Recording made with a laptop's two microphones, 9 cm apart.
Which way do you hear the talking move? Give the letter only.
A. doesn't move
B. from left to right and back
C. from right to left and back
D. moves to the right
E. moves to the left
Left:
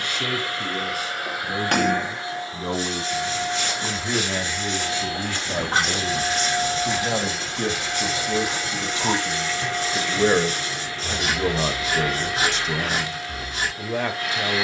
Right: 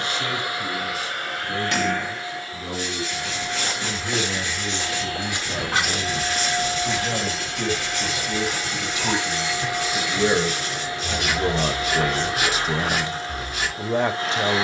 D.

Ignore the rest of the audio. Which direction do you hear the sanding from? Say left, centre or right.
left.